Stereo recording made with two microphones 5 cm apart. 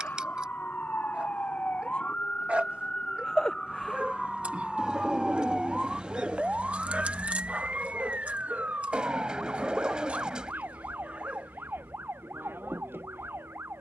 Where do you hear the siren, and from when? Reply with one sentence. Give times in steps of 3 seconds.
In this clip you hear the siren on the left from 0 s, in the centre from 3 s and on the right from 6 s.